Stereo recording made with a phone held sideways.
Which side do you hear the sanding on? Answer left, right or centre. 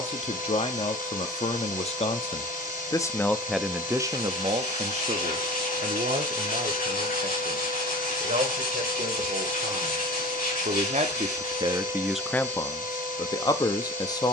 left.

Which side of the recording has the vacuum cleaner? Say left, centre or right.
left.